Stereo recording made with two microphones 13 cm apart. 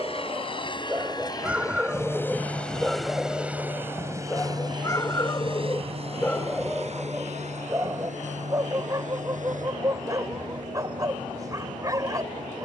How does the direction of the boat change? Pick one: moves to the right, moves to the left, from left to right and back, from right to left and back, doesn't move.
moves to the right.